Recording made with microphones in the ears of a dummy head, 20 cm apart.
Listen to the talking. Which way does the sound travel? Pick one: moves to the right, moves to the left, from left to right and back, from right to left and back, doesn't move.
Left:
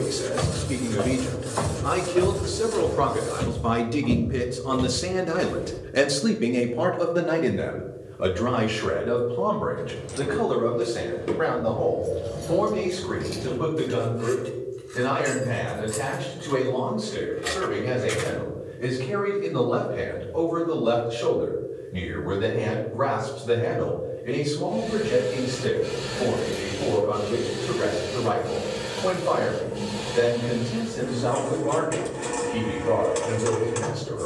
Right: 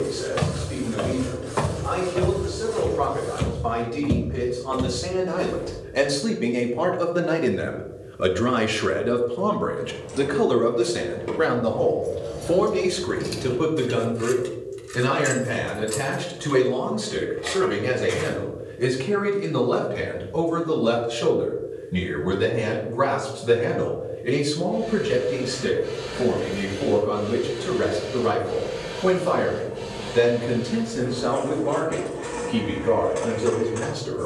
moves to the right.